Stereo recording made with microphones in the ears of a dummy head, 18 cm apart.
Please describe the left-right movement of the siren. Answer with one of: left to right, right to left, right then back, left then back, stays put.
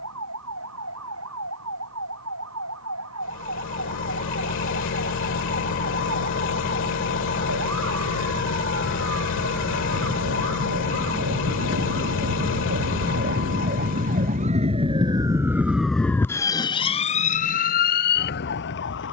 right to left.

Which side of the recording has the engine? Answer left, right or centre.
left.